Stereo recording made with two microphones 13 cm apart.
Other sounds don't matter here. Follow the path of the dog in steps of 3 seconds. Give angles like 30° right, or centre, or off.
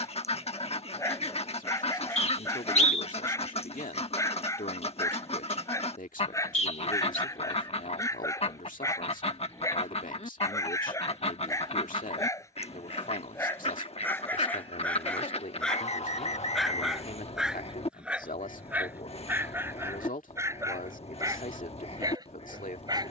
20° left, 20° left, 20° left, 20° left, 20° left, centre, 20° right, 30° right.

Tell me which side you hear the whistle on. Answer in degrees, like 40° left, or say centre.
50° left.